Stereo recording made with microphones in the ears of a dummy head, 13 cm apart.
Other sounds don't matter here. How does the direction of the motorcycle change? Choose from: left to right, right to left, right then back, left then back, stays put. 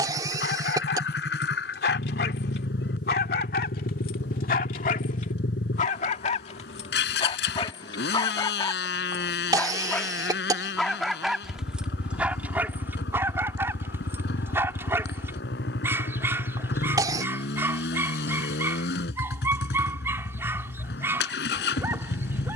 stays put.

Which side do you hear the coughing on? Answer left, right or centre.
right.